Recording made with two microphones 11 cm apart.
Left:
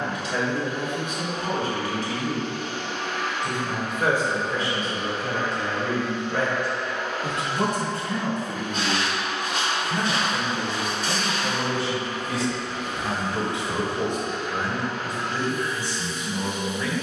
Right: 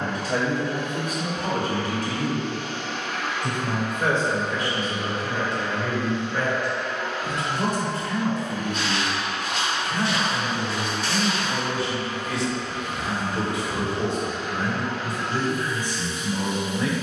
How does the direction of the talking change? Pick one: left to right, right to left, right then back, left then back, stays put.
left then back.